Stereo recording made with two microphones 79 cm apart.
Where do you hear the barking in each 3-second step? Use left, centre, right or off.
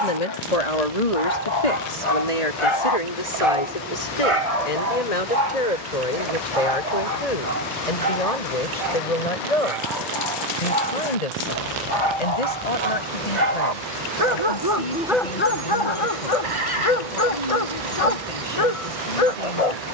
left, right, right, right, right, left, left.